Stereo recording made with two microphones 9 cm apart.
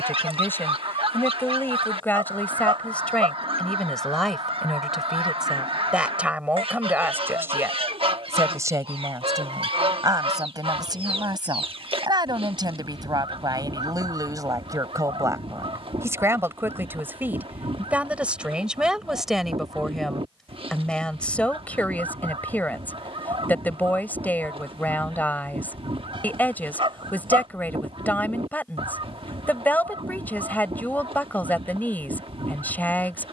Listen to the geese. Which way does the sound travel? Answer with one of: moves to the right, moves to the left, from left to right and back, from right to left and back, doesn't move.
doesn't move.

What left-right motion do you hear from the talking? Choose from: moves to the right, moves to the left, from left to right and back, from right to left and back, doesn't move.
from left to right and back.